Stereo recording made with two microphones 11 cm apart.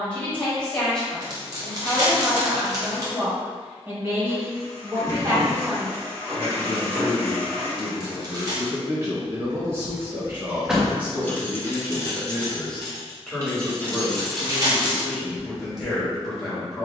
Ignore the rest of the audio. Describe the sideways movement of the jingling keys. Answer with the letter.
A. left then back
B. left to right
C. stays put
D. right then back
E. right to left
A.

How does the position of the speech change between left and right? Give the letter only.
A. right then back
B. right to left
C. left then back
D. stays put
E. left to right
A.